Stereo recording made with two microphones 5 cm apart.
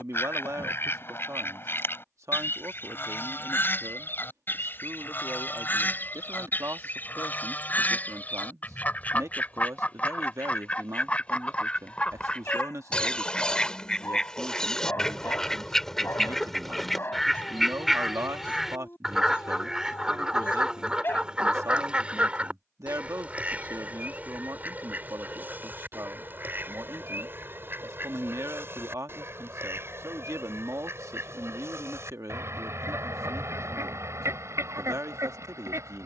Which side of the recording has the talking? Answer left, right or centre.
right.